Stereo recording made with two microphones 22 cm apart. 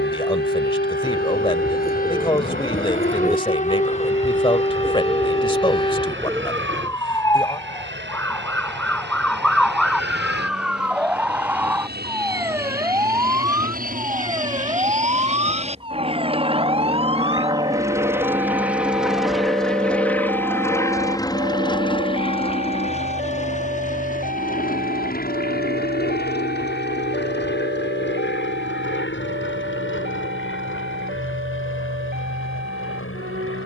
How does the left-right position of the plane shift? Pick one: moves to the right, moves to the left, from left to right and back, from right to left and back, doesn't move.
moves to the left.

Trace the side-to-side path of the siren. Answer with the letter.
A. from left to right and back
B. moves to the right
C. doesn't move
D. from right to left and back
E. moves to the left
B.